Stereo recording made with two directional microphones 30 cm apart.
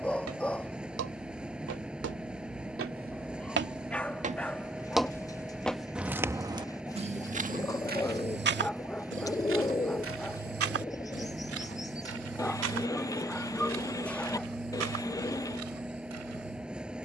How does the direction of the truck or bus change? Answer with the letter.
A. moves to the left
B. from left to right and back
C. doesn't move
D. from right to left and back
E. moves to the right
C.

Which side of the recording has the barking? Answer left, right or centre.
centre.